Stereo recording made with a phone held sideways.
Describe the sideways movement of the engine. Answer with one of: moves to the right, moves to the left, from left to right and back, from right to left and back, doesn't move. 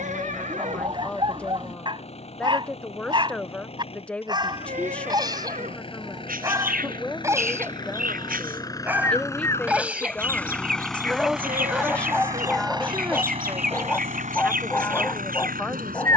moves to the right.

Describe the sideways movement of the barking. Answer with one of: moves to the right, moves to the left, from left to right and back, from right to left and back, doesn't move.
moves to the left.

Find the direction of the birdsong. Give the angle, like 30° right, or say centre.
80° right.